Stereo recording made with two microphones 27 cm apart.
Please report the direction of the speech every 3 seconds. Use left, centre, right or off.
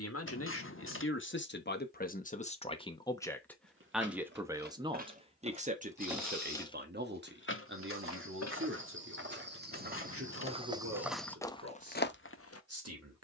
left, centre, right, right, right.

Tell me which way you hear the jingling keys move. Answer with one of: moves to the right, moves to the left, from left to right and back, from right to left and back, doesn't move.
moves to the left.